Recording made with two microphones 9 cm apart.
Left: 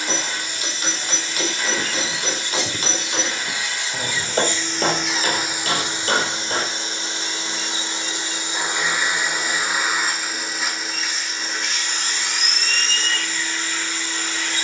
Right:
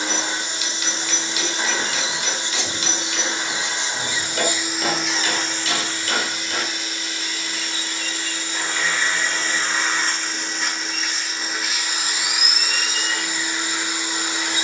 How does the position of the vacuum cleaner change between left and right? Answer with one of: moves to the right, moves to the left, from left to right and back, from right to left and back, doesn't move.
from right to left and back.